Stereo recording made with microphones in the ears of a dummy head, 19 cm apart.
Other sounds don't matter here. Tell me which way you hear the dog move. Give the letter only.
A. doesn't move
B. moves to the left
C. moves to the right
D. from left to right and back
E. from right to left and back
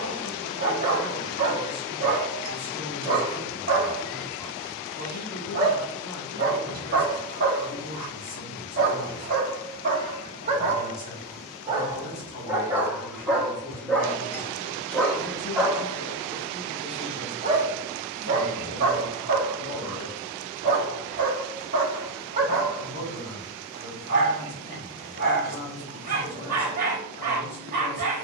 E.